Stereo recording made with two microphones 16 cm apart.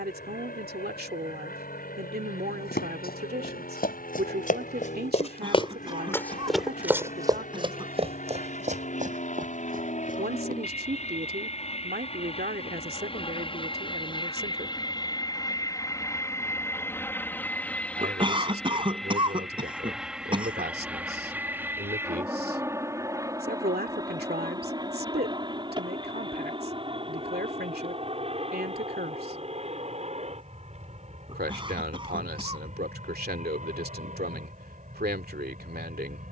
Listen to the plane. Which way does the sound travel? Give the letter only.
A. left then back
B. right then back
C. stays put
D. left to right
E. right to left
D.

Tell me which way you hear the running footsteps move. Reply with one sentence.
In this clip you hear the running footsteps travel towards the right.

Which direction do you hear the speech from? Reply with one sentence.
In this clip you hear the speech on the right.